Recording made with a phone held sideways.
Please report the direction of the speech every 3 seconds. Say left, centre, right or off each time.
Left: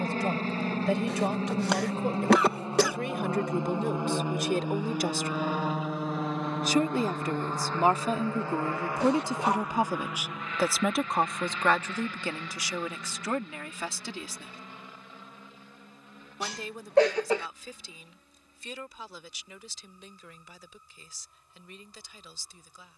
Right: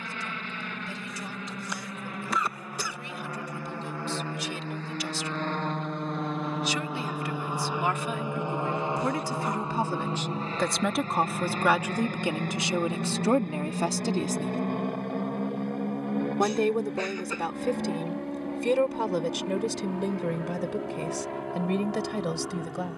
left, left, left, centre, right, right, right, right.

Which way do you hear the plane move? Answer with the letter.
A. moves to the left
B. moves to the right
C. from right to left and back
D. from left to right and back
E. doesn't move
B.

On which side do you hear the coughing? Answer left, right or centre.
left.